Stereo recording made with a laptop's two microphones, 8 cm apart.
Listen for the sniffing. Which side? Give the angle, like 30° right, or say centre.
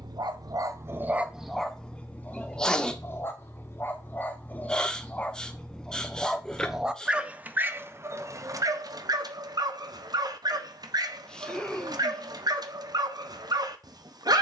10° left.